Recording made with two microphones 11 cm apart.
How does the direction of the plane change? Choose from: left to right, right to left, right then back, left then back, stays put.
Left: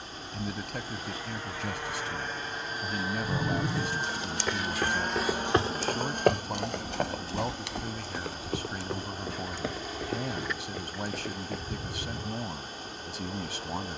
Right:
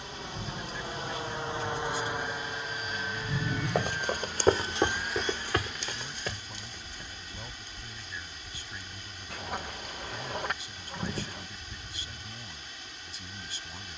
right to left.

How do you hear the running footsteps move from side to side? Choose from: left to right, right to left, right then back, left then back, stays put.
right to left.